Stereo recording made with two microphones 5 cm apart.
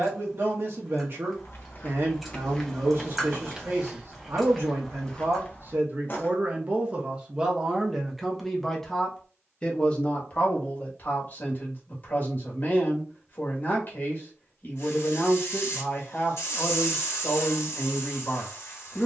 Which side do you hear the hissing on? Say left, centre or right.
left.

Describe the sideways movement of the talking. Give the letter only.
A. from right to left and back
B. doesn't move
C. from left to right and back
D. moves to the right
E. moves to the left
E.